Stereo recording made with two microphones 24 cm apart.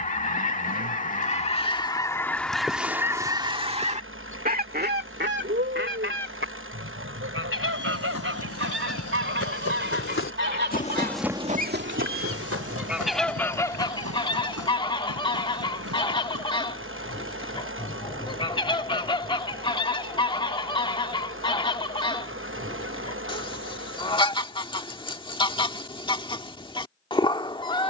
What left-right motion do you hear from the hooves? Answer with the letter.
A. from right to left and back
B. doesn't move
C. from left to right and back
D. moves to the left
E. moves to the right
E.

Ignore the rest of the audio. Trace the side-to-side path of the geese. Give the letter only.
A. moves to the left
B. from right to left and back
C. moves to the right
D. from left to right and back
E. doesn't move
D.